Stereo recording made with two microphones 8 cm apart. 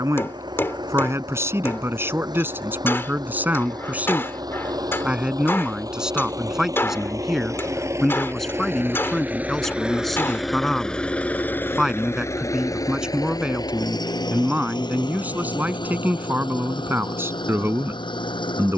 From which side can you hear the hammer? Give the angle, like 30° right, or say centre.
30° left.